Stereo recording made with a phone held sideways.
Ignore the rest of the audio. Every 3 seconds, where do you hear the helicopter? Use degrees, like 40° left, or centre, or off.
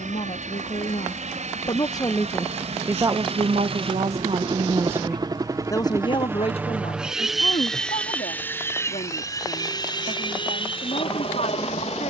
60° right, 40° right, centre, 40° left.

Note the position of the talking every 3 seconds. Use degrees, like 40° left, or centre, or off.
30° left, 30° right, 50° left, 60° left.